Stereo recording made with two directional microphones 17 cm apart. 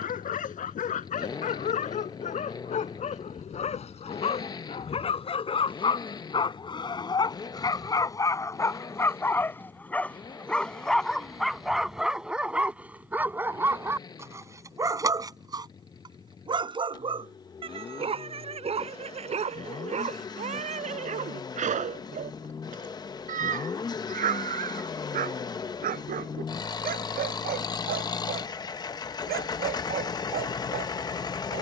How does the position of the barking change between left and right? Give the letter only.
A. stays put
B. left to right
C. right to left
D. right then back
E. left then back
B.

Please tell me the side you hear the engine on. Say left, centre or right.
left.